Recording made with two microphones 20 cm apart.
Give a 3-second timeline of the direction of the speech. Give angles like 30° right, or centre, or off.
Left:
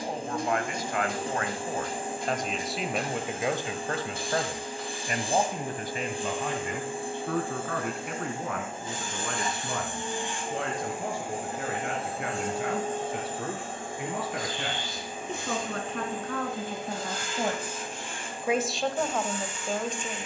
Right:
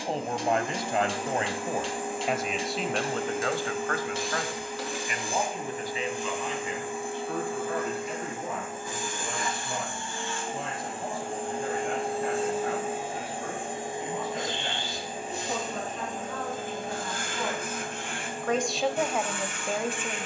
20° right, 30° left, 60° left, 70° left, 80° left, 60° left, centre.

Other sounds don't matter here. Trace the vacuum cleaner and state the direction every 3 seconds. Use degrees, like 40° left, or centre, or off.
30° left, 30° left, 30° left, 10° left, 10° right, 50° right, 70° right.